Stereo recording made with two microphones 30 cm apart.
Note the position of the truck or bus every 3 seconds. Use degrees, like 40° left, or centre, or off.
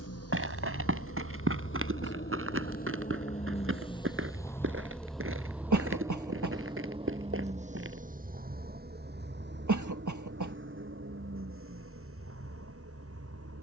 40° left, 10° left, 20° right, 40° right, 50° right.